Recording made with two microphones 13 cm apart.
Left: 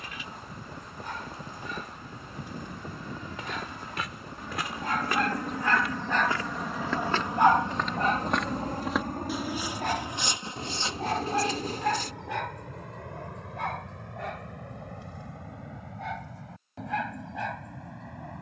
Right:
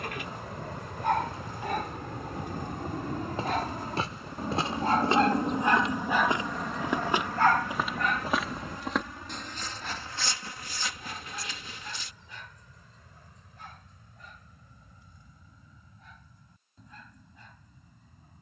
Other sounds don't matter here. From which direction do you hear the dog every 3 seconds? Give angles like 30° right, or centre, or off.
60° right, 40° right, 20° left, 60° left, 70° left, 80° left.